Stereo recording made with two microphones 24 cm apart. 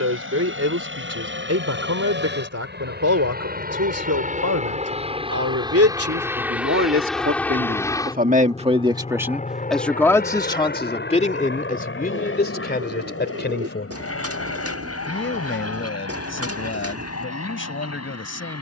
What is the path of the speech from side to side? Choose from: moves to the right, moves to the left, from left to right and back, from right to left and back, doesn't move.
moves to the left.